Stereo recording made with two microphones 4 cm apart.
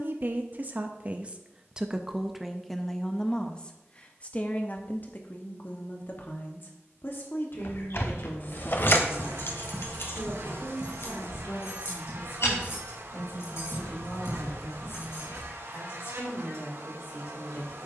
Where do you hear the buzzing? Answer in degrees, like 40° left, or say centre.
80° right.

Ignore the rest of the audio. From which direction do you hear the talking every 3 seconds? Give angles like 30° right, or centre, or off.
20° right, 30° left, 50° left, 60° left, 70° left, 70° left.